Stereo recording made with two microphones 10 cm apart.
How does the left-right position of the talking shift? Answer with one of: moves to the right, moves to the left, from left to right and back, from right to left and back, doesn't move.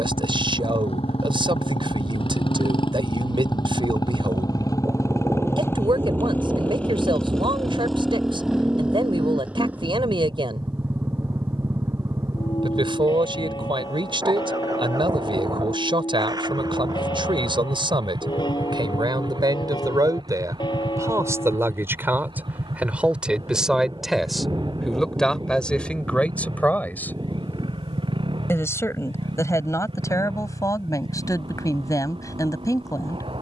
moves to the left.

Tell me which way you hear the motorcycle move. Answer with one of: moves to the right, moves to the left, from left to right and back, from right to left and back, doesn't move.
moves to the right.